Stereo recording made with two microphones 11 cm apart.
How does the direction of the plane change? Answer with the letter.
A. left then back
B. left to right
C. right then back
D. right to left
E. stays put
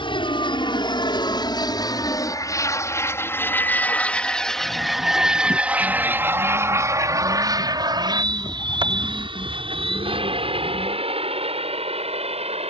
B.